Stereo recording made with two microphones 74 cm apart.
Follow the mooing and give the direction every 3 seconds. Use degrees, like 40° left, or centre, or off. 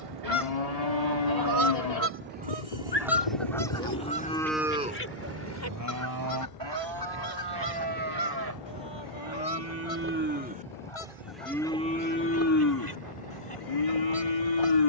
50° left, 10° left, 30° right, 10° right, 30° left.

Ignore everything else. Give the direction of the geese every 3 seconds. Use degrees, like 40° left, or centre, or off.
20° right, 10° left, 30° left, 40° left, 40° left.